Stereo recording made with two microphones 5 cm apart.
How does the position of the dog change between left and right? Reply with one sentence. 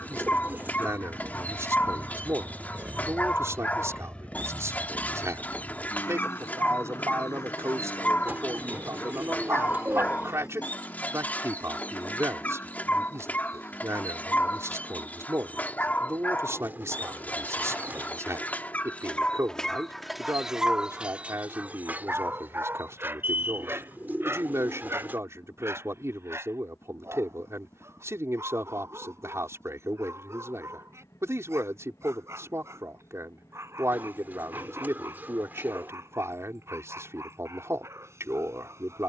You can hear the dog go from the left side to the right.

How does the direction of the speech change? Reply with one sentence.
In this clip you hear the speech stay in one place.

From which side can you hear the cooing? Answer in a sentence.
In this clip you hear the cooing on the right.